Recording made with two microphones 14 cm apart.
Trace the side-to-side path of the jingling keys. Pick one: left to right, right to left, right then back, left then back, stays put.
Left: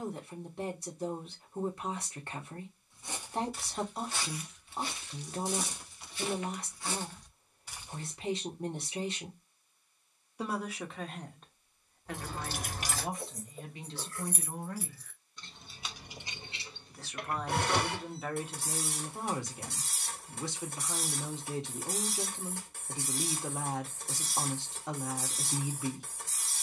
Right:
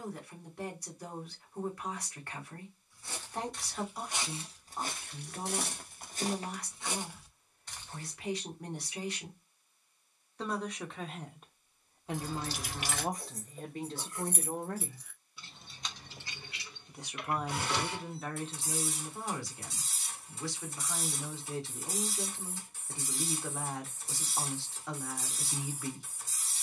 right then back.